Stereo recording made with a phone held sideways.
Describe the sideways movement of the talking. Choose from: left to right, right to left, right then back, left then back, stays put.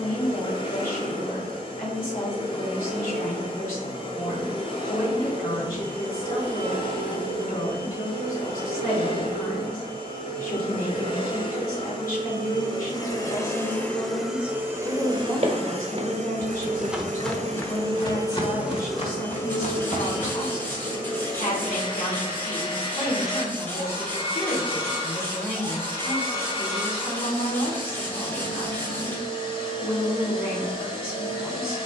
stays put.